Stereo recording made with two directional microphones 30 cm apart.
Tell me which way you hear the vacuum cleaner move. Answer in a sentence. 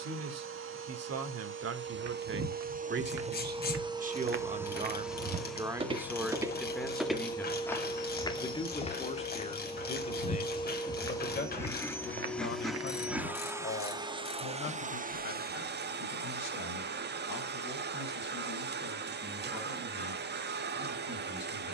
You can hear the vacuum cleaner go left and come back.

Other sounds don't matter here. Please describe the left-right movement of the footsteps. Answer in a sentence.
You can hear the footsteps go left and come back.